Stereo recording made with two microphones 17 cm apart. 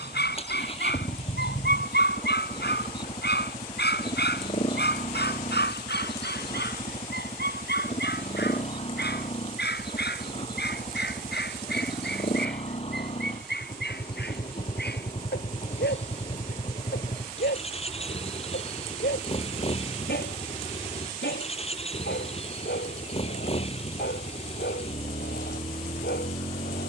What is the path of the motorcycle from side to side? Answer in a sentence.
In this clip you hear the motorcycle stay in one place.